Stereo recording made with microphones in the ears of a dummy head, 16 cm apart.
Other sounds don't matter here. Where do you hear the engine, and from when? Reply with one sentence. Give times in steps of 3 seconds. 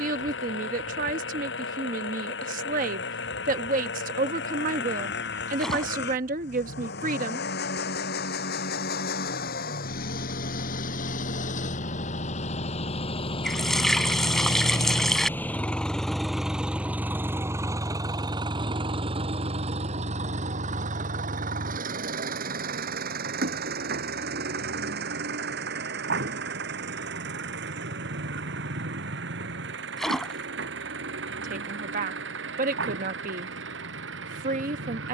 In this clip you hear the engine on the left from 0 s, in the centre from 15 s and on the right from 18 s.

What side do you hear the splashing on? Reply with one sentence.
In this clip you hear the splashing in the centre.